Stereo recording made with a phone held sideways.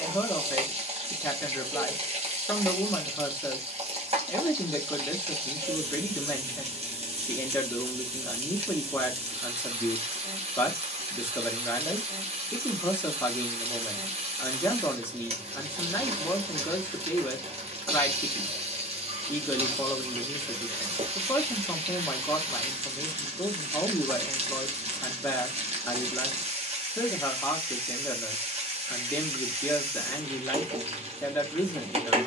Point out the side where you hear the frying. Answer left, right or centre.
right.